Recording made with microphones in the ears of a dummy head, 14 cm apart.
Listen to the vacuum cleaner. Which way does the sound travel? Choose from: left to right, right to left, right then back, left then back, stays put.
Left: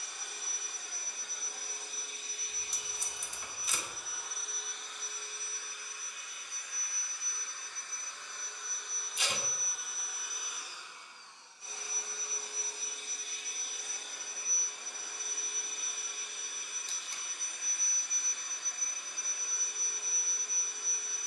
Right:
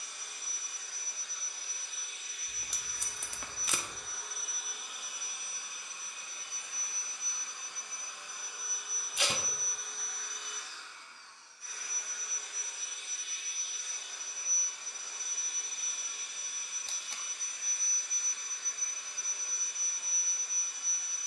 right then back.